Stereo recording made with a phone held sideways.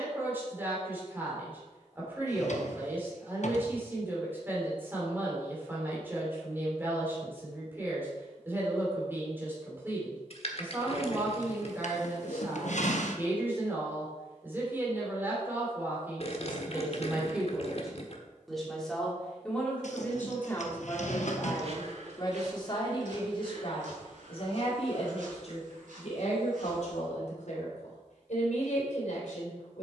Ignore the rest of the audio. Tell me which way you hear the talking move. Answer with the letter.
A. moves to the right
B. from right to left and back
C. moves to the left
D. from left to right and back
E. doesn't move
C.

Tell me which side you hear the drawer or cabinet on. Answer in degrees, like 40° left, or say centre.
60° left.